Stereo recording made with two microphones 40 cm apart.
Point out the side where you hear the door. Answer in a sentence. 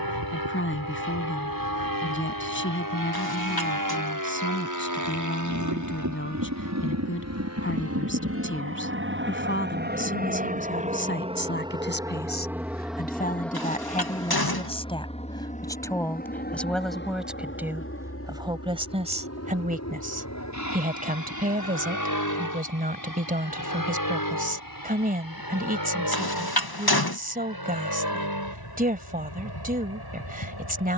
In this clip you hear the door on the left.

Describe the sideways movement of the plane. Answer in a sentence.
You can hear the plane go from the right side to the left.